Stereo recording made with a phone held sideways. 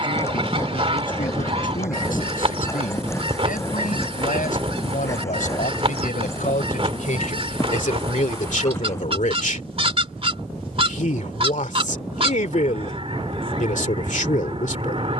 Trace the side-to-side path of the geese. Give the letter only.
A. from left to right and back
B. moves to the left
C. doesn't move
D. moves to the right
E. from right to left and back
C.